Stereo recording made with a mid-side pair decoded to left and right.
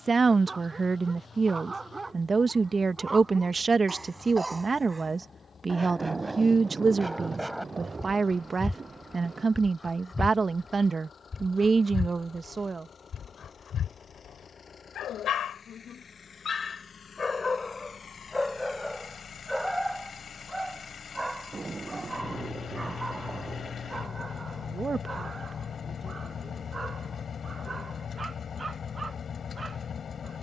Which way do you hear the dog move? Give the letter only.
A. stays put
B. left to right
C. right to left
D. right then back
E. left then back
E.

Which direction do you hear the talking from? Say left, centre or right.
right.